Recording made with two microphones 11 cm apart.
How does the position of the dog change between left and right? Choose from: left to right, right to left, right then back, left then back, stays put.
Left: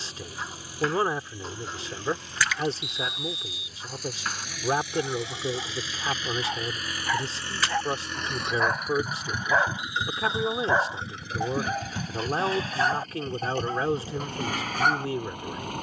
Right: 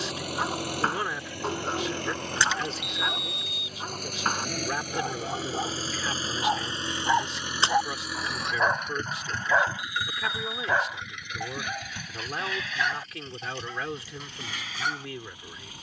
right to left.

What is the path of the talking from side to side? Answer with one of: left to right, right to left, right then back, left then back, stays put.
stays put.